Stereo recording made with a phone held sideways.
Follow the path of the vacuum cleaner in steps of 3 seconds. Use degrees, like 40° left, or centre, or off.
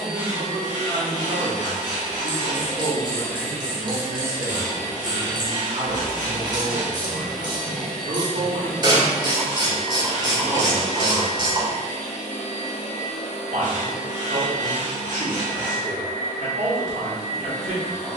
50° left, 10° right, centre, 40° left, 50° left, 50° left.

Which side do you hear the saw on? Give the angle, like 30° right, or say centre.
60° right.